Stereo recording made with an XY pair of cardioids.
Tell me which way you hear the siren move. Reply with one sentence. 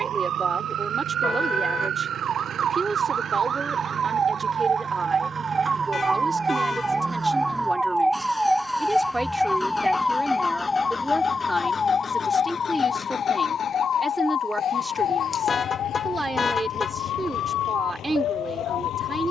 You can hear the siren travel towards the left.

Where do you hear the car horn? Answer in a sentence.
In this clip you hear the car horn on the left.